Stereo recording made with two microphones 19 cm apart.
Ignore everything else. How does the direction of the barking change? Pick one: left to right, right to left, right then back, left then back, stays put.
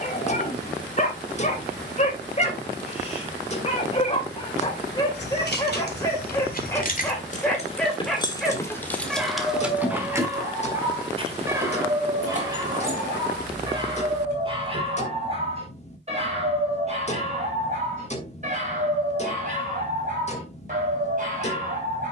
left to right.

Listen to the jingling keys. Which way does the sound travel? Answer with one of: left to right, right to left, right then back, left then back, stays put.
left to right.